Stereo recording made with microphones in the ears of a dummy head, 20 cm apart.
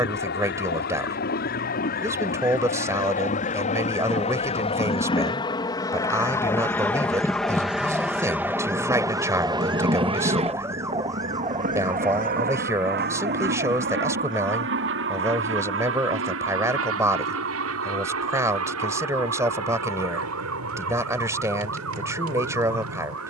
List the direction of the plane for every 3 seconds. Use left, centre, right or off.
left, left, centre, right, right, right, right, right.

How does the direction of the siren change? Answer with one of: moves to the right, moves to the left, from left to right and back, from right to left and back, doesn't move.
moves to the right.